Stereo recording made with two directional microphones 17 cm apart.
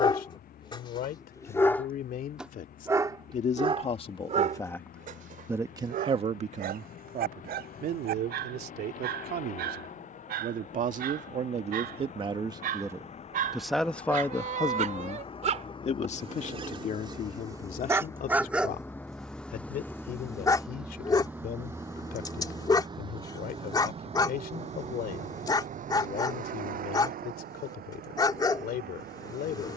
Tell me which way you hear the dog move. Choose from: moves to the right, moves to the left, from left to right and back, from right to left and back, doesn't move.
from left to right and back.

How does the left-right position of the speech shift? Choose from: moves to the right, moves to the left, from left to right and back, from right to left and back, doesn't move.
from left to right and back.